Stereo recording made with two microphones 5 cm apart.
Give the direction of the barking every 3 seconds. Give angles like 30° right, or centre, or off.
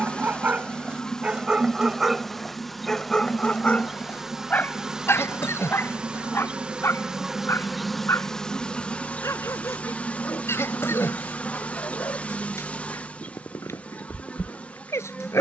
20° right, 30° left, 60° left, 70° left, 70° left.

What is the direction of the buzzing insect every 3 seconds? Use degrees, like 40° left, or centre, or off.
10° left, 10° right, centre, 30° left, 30° left.